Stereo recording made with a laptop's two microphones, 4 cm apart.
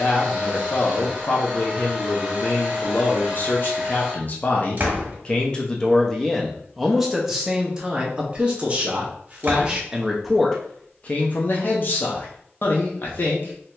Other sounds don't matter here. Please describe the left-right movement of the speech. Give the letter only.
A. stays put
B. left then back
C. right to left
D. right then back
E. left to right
D.